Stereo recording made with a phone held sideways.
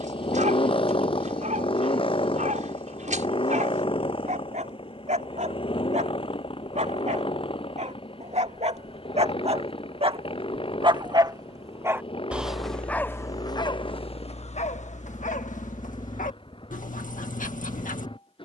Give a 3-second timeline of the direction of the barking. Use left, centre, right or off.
right, right, right, right, left, left.